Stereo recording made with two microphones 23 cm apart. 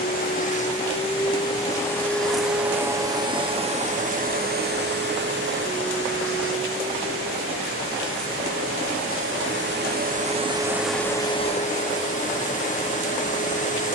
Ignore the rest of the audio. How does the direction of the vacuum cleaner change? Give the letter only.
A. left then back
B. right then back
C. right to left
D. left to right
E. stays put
B.